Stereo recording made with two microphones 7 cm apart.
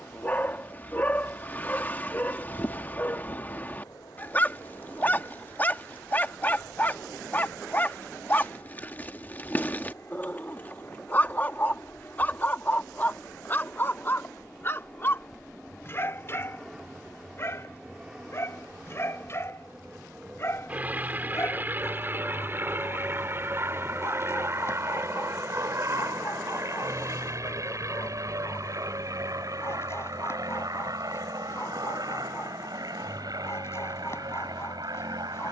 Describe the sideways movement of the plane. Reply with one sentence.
You can hear the plane go from the left side to the right.